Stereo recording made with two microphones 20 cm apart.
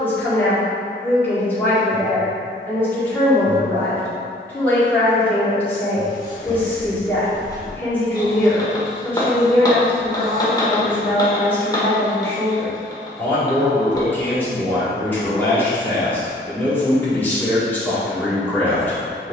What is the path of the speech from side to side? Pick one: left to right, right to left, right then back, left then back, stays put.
stays put.